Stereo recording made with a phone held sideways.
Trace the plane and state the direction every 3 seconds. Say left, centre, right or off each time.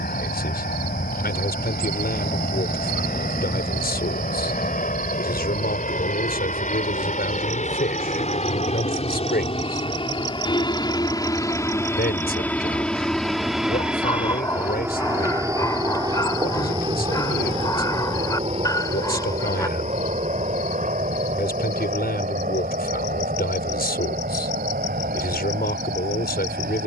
left, left, left, left, centre, right, right, right, right.